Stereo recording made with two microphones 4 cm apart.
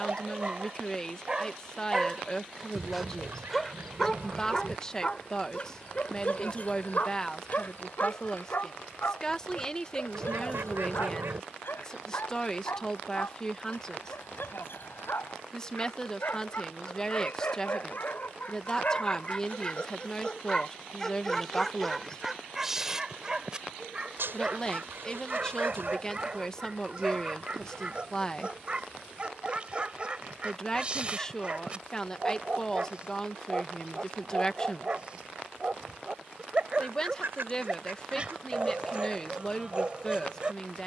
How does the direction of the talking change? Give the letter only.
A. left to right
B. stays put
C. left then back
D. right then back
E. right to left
B.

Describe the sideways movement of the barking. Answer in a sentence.
You can hear the barking go left and come back.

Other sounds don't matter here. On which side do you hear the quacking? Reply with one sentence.
In this clip you hear the quacking on the right.